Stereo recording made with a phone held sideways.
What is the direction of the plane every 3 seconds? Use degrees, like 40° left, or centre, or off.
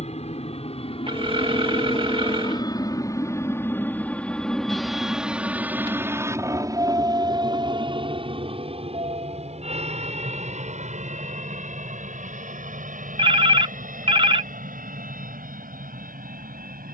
40° left, centre, 30° right, 50° right, 60° right, 60° right.